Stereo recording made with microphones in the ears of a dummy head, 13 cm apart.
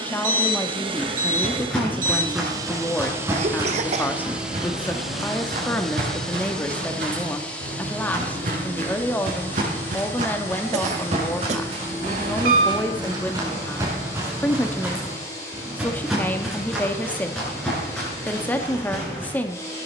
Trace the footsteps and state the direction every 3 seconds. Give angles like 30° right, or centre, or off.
centre, 50° right, 70° right, 50° right, 30° right, centre, 10° left.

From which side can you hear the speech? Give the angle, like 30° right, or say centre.
10° left.